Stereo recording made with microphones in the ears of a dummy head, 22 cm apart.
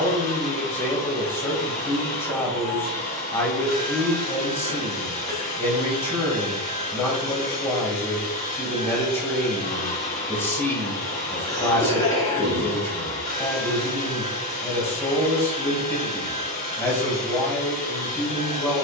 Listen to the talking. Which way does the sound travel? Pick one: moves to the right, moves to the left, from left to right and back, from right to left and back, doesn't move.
doesn't move.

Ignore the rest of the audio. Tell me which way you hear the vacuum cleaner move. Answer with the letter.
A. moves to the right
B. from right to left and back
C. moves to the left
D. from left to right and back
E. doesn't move
E.